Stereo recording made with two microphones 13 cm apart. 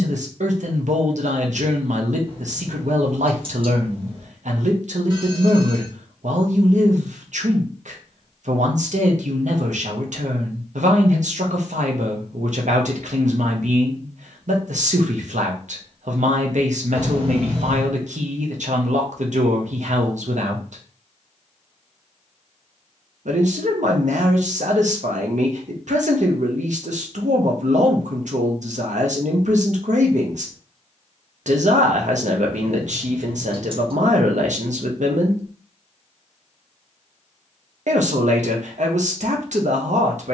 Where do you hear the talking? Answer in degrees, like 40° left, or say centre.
70° right.